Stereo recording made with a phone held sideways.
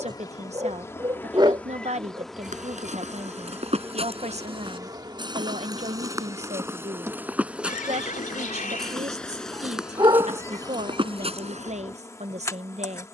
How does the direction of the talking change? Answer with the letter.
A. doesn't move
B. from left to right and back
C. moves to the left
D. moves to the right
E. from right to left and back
A.